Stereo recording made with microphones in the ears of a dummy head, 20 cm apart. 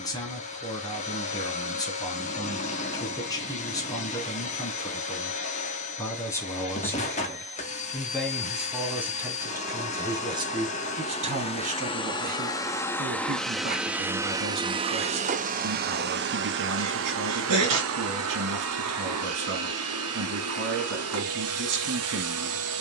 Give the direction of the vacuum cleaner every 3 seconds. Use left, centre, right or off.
left, left, left, left, centre, right, right, right.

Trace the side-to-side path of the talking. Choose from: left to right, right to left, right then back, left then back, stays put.
left to right.